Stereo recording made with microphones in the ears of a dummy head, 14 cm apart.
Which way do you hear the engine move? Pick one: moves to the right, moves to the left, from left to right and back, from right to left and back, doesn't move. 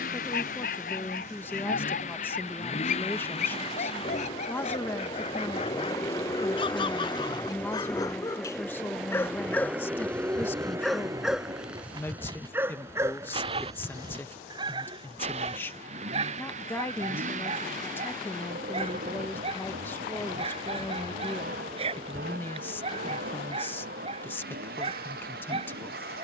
moves to the right.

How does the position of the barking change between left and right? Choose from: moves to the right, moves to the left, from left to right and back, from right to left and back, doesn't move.
moves to the right.